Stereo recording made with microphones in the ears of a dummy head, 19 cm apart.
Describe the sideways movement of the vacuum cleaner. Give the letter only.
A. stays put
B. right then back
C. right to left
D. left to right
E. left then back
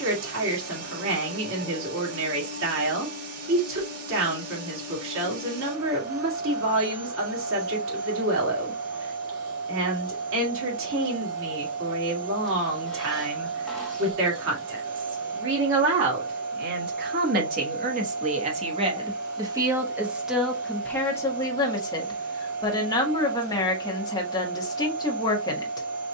A.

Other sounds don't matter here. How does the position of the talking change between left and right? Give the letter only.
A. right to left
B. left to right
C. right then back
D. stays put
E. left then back
A.